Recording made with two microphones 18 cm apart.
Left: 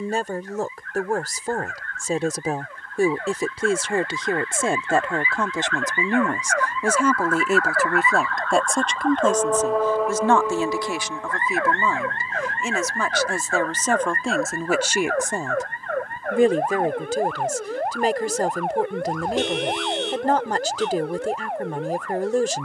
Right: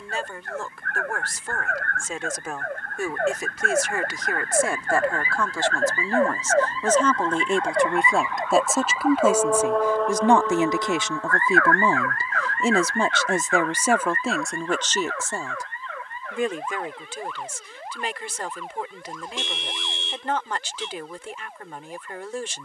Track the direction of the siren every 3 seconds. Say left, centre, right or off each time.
right, right, right, centre, left, left, left, left.